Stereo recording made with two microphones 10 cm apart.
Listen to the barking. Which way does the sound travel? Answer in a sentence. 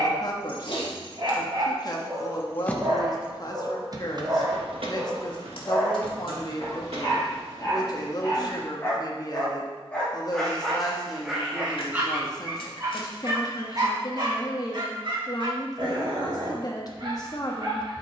You can hear the barking move from right to left and back again.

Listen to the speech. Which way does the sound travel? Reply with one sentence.
In this clip you hear the speech stay in one place.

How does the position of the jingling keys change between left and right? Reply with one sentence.
You can hear the jingling keys move from left to right.